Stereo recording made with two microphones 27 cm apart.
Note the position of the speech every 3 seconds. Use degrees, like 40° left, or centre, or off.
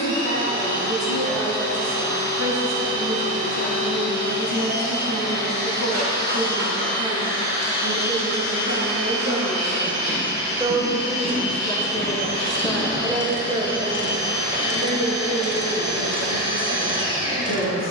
70° right, 70° right, 60° right, 20° right, 10° right, 60° right.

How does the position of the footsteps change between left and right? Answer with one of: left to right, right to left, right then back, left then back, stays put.
left to right.